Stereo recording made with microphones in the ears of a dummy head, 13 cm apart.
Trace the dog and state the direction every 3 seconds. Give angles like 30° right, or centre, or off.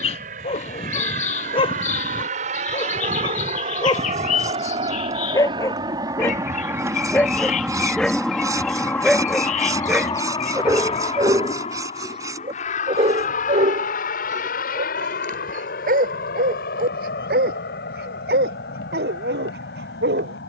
40° left, 30° left, 10° left, 10° right, 40° right, 60° right, 70° right.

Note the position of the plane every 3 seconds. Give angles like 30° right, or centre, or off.
60° right, 40° right, 10° right, 30° left, 50° left, 60° left, 70° left.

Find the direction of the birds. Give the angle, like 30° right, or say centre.
50° left.